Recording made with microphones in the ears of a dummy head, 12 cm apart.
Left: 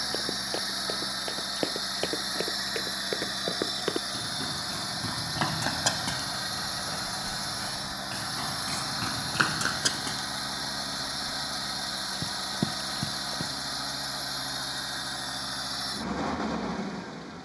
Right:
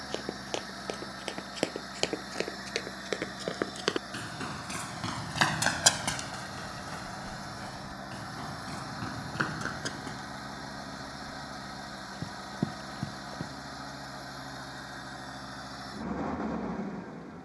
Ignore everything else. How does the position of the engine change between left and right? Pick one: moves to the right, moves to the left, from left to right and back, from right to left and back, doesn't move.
doesn't move.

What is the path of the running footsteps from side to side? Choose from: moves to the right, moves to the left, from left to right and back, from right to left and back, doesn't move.
moves to the left.